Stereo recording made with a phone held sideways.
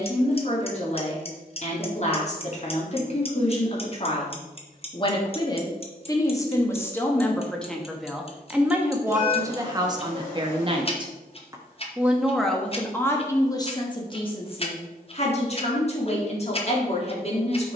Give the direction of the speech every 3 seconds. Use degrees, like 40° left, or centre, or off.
50° left, 40° left, 10° left, 30° right, 20° left, 40° left.